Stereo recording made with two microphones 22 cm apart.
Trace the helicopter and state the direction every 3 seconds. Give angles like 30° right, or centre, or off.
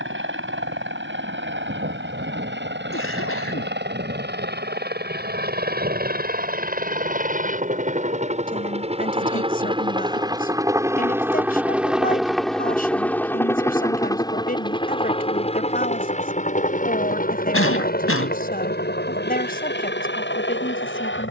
60° right, 50° right, 40° right, 20° right, 10° left, 30° left, 50° left.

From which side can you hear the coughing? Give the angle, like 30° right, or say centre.
70° left.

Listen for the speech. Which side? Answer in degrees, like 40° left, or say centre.
40° left.